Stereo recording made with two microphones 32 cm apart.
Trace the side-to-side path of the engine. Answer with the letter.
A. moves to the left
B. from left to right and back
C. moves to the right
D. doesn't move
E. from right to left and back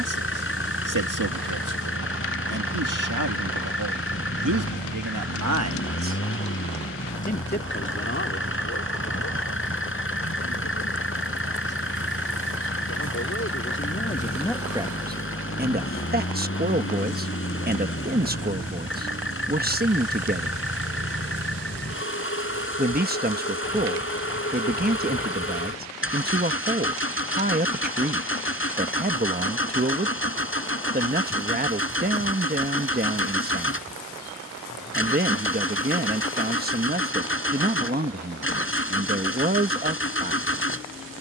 D.